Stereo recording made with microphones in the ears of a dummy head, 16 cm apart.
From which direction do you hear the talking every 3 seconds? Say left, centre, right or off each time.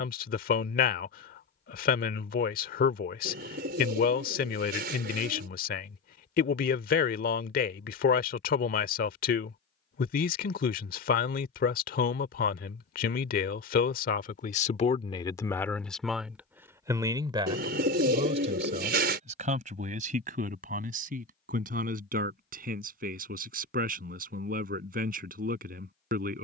left, left, left, left, left, centre, right, right, right.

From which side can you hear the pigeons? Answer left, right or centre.
right.